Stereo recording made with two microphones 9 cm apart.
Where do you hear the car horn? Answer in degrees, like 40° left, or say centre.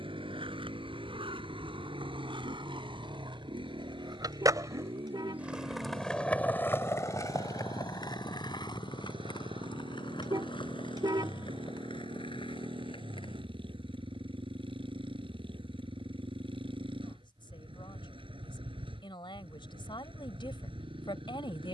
60° right.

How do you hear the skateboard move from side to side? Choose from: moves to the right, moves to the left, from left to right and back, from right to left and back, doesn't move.
moves to the left.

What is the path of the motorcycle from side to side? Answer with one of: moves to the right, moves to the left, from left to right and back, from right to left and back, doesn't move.
doesn't move.